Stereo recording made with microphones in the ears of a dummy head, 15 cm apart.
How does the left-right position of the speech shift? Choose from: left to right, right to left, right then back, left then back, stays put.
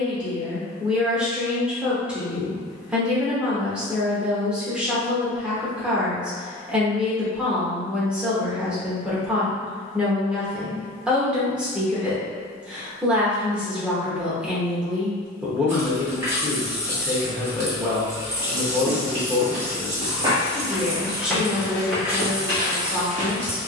stays put.